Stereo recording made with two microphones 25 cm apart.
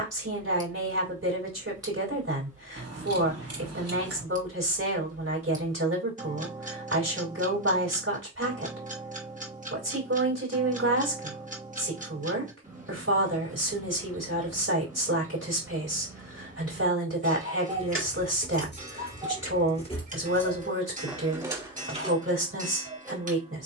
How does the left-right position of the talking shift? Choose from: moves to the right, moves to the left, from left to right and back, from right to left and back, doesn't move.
doesn't move.